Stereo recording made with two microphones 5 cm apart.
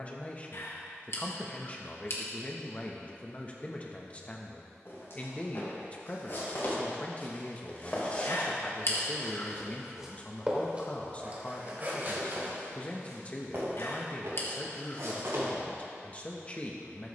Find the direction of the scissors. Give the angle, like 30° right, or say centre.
60° left.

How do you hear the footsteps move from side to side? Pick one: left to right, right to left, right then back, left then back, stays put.
left to right.